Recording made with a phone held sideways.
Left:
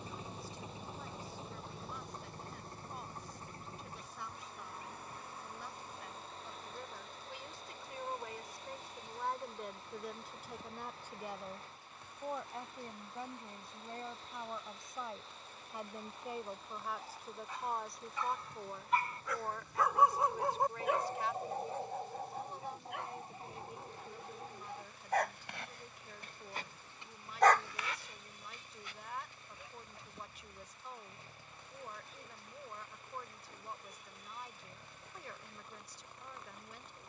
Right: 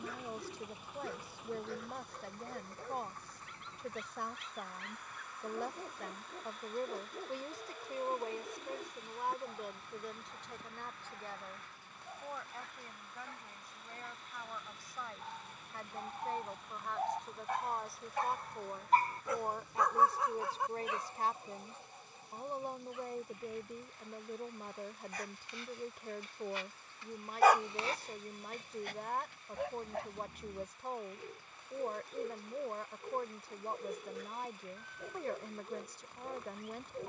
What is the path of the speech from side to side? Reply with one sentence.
In this clip you hear the speech go left and come back.